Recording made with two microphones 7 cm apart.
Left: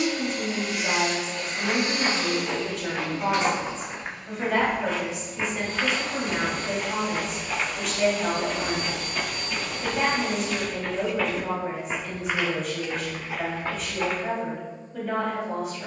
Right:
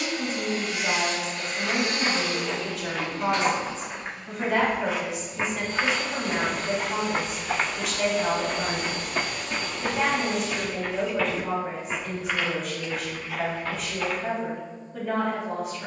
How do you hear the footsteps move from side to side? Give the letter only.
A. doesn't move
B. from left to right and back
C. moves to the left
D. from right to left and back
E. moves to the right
B.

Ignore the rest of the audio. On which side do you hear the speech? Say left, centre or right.
centre.